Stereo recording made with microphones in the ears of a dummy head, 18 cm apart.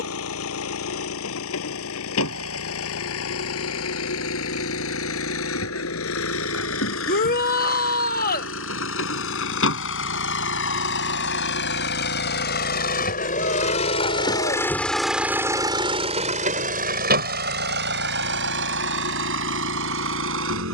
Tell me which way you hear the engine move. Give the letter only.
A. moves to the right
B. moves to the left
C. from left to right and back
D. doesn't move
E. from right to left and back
A.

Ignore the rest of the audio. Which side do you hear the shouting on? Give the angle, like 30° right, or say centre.
40° left.